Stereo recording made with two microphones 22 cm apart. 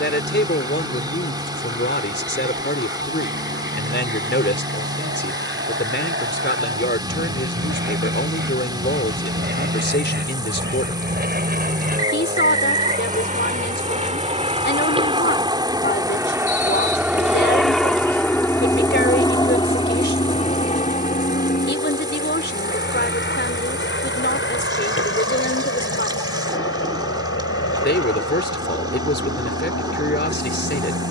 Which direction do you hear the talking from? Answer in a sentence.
In this clip you hear the talking on the left.